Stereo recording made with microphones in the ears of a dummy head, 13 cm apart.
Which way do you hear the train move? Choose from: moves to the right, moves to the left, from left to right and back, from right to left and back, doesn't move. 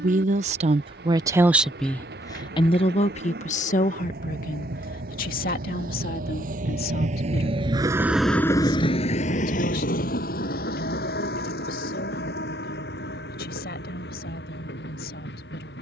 moves to the left.